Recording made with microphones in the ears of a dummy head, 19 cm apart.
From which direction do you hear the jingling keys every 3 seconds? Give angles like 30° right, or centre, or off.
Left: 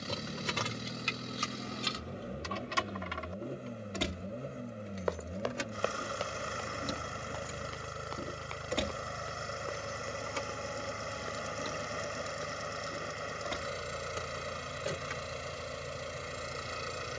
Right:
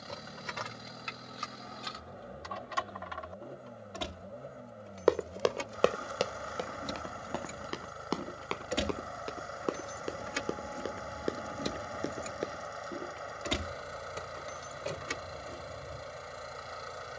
40° left, 30° left, centre, 30° right, 50° right, 60° right.